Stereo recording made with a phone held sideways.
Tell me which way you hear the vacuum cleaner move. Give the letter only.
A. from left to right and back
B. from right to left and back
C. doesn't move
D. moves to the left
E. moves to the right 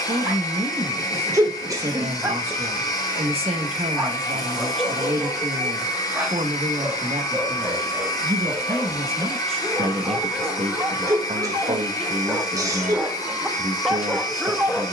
C.